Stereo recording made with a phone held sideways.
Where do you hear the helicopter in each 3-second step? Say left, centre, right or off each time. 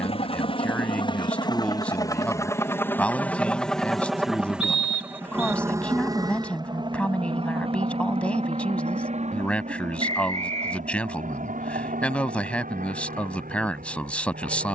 left, centre, right, right, right.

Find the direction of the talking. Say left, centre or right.
centre.